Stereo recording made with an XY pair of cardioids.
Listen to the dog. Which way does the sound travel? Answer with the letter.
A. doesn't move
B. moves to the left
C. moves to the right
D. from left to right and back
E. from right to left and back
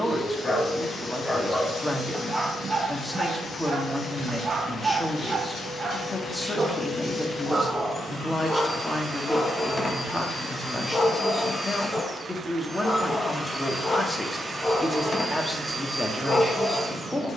D.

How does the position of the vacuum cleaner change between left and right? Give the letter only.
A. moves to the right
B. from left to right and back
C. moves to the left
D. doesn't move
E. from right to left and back
A.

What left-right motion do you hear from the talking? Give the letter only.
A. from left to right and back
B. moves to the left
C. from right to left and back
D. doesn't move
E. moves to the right
D.